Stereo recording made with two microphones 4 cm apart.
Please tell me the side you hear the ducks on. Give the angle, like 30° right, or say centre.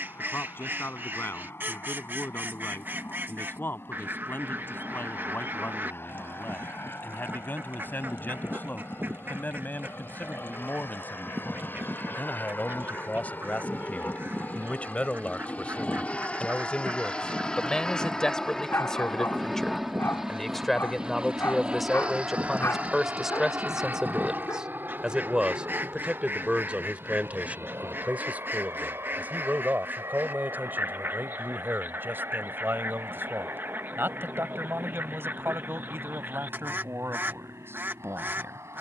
50° right.